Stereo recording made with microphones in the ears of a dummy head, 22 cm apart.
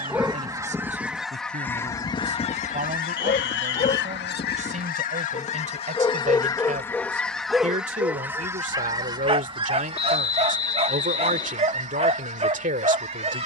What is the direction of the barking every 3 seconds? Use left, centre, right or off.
centre, left, centre, right, right.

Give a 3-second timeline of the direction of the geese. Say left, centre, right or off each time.
centre, left, centre, right, right.